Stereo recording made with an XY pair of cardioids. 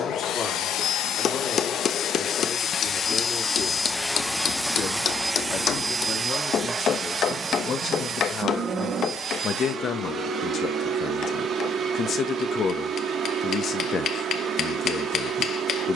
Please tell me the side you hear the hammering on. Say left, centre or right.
left.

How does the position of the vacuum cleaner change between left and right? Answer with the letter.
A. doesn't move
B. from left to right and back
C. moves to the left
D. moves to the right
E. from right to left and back
D.